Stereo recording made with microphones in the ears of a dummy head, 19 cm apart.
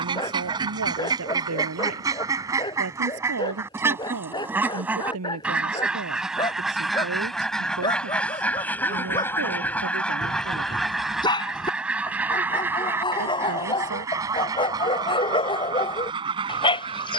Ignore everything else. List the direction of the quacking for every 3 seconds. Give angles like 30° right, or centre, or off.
20° right, 10° right, centre, centre, 10° right, 20° right.